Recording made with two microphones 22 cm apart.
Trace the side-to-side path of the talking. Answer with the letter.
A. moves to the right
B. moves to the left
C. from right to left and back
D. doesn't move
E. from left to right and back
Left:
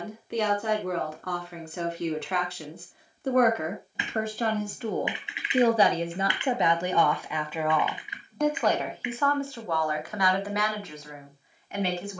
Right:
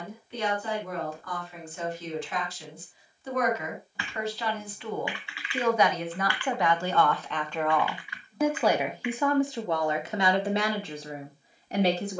A.